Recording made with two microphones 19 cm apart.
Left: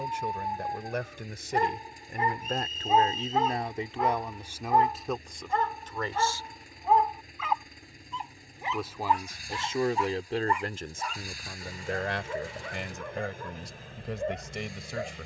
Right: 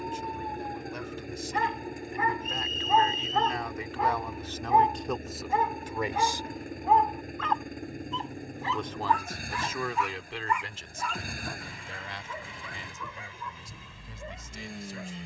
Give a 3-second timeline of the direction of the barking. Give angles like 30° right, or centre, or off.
40° left, centre, centre, 30° left, 50° left.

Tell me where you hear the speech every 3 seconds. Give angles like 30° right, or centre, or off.
60° left, 10° left, 10° right, 40° left, 80° left.